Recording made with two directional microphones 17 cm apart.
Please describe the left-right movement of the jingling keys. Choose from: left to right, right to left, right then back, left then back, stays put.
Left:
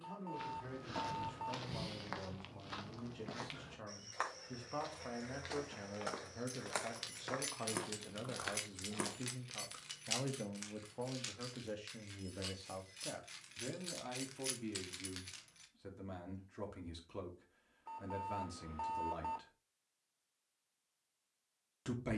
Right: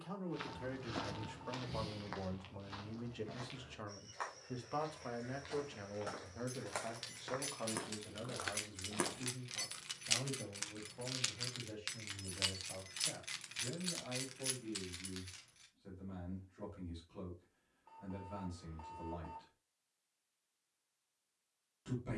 right then back.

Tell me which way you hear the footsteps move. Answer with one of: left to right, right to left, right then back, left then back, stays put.
left then back.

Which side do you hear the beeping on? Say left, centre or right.
left.